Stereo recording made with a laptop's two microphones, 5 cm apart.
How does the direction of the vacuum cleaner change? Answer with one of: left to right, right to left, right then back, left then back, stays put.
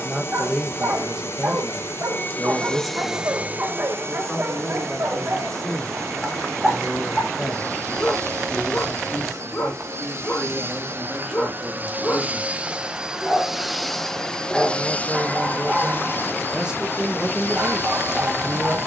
right then back.